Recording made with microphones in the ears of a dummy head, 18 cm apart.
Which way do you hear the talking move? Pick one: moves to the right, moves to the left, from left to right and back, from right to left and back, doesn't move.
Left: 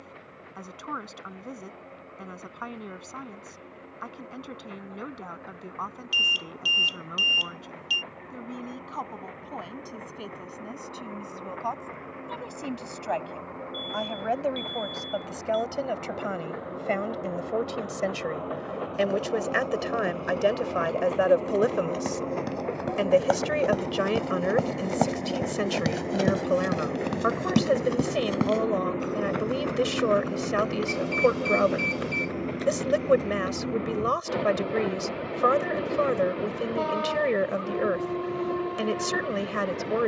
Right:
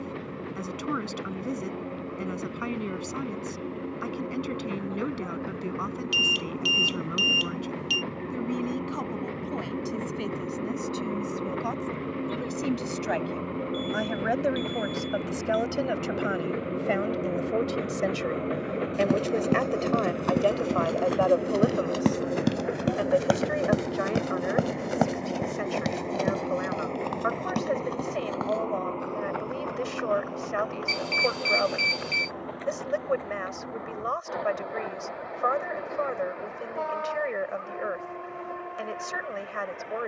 moves to the left.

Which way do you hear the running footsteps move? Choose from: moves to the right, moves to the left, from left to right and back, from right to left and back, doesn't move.
moves to the left.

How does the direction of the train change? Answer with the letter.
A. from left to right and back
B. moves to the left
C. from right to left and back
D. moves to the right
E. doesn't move
B.